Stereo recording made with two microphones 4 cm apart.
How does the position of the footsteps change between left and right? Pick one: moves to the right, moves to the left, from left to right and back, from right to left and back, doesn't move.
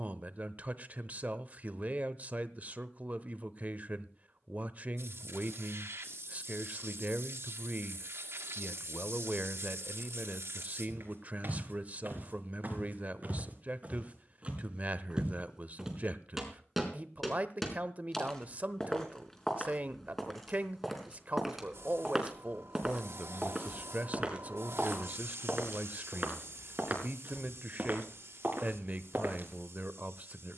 from right to left and back.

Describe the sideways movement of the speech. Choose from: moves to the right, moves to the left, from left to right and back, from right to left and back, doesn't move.
doesn't move.